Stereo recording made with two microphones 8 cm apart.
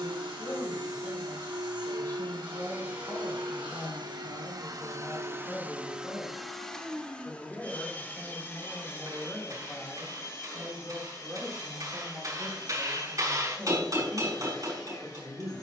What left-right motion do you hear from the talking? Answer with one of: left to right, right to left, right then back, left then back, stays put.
left to right.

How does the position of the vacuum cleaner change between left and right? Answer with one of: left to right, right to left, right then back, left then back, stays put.
right to left.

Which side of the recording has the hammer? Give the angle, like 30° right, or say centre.
50° right.